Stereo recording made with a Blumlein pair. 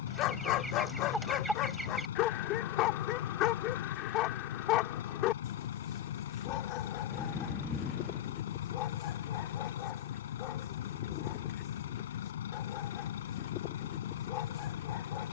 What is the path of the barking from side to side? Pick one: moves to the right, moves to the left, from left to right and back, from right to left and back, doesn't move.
doesn't move.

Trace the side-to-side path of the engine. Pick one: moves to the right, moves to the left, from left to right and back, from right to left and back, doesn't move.
doesn't move.